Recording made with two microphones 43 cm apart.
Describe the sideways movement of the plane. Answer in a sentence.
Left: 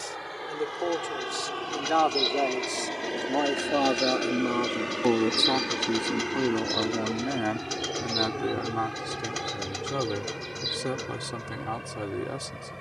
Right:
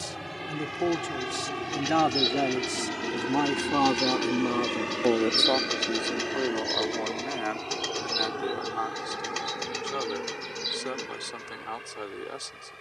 You can hear the plane go from the right side to the left.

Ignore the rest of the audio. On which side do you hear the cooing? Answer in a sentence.
You can hear the cooing in the centre.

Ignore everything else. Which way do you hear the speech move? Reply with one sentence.
In this clip you hear the speech go from the right side to the left.